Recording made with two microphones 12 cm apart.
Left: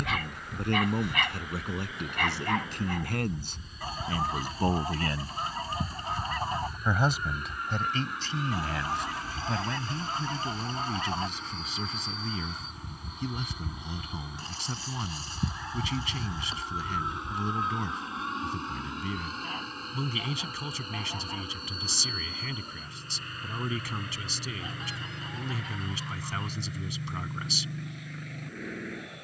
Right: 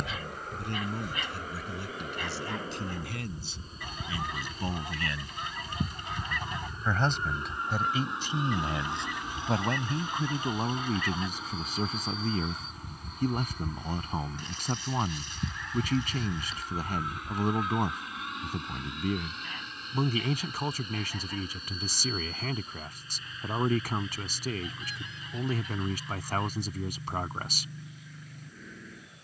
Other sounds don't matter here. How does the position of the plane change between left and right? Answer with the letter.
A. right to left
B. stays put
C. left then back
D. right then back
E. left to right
A.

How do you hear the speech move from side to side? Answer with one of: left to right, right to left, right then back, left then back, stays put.
left to right.